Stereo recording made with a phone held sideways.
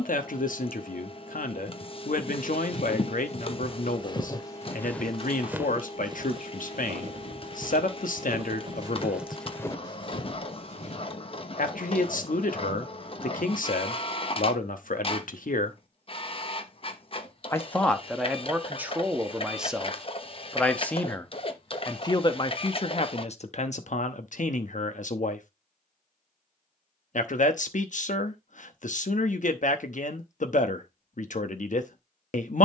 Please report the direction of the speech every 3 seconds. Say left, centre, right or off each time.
left, left, left, left, left, left, centre, left, left, left, left.